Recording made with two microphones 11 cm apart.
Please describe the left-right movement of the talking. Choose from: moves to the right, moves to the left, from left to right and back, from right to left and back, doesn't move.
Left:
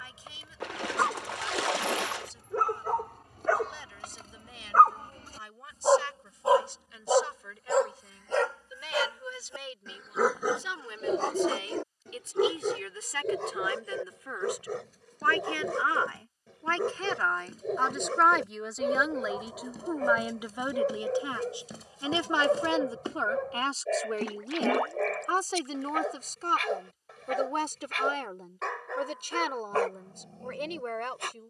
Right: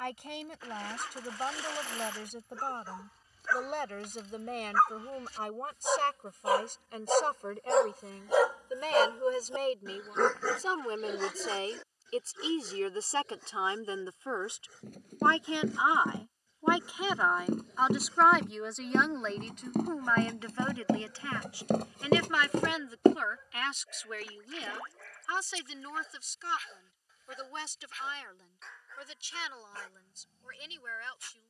moves to the left.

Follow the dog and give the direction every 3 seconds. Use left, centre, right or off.
left, left, centre, left, left, left, left, left, left, left, left.